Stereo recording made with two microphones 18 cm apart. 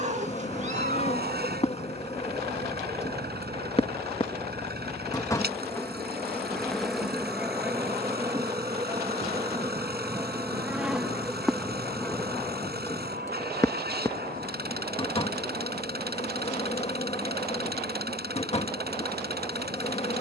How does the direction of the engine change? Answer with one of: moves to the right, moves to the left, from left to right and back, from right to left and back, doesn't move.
doesn't move.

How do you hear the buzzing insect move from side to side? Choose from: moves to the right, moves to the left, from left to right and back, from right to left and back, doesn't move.
from left to right and back.